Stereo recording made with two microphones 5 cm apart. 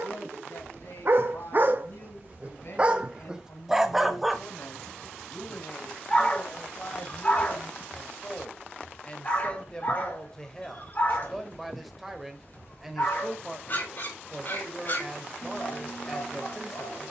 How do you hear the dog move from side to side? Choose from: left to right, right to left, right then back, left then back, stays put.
right to left.